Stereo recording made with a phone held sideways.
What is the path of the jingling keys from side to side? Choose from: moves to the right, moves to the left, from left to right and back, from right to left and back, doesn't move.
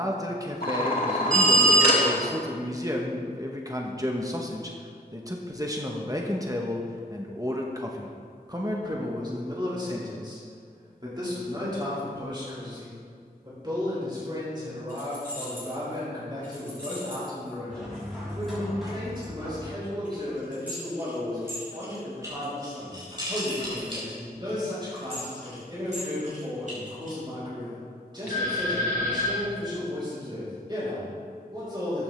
moves to the right.